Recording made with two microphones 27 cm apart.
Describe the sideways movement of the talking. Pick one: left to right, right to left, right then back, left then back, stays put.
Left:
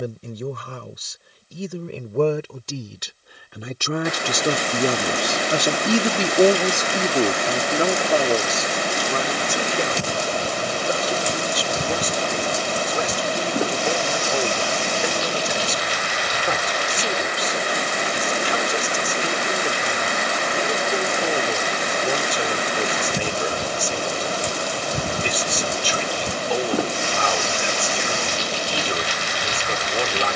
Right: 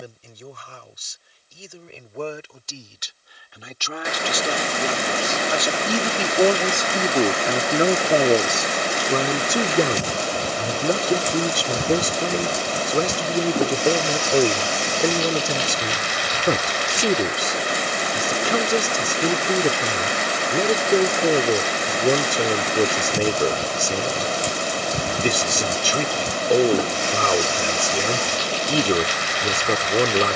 left to right.